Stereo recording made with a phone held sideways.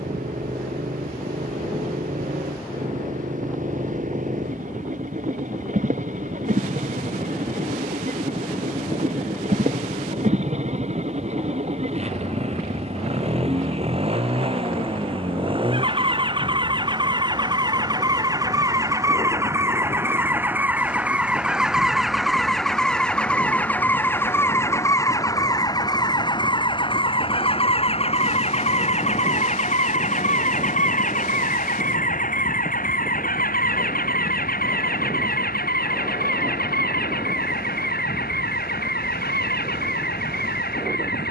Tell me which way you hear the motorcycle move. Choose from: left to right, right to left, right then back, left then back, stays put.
right to left.